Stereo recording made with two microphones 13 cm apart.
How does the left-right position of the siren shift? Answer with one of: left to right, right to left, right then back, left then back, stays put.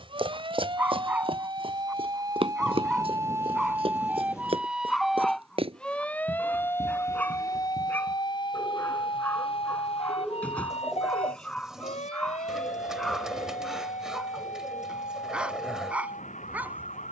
right to left.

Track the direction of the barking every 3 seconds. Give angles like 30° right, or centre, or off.
10° right, centre, 10° left, 10° left, centre, 10° right.